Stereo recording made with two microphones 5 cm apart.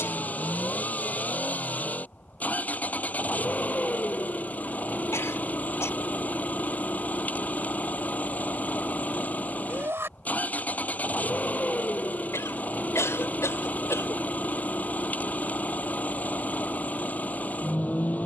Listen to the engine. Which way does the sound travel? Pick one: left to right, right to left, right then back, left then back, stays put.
stays put.